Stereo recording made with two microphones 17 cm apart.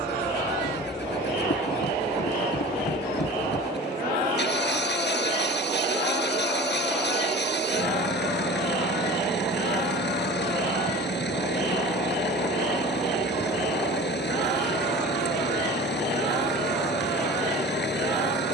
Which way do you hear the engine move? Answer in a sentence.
You can hear the engine stay in one place.